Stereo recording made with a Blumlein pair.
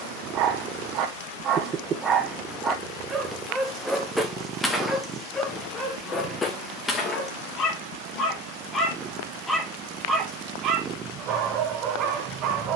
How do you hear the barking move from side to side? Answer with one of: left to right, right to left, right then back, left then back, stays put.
left then back.